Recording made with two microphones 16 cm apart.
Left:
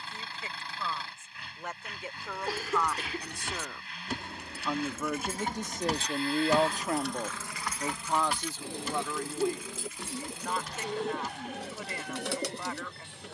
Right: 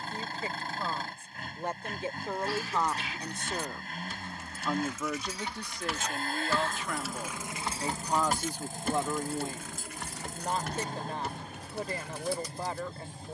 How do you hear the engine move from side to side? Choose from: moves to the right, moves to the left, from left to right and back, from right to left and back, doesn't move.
doesn't move.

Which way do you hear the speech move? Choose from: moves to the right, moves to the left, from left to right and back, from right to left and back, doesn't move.
from right to left and back.